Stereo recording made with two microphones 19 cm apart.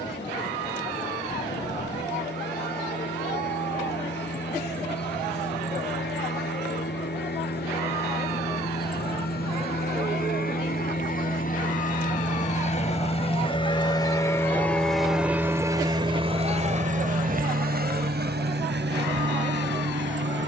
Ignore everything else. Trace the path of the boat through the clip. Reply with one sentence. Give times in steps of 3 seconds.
You can hear the boat on the left from 0 s and on the right from 15 s.